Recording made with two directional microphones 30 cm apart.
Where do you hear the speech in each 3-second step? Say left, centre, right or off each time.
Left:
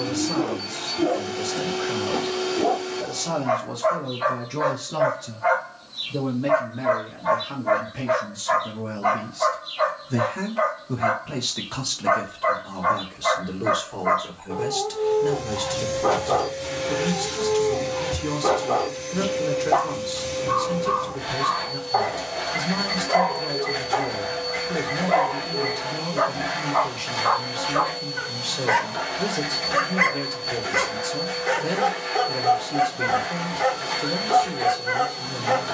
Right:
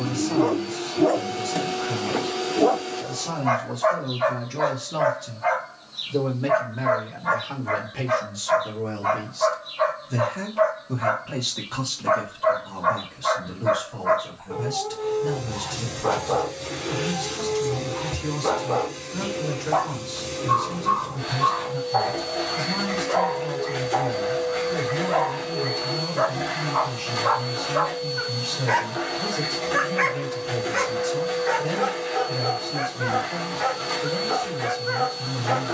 left, centre, right, centre, left, left, left, left, left, left, left, left.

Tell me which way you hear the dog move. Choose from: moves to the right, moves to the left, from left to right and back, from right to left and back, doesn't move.
moves to the left.